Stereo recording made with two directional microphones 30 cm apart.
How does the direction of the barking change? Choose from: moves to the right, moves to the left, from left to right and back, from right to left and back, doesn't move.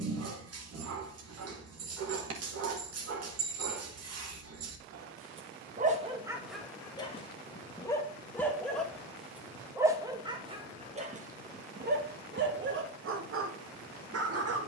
from right to left and back.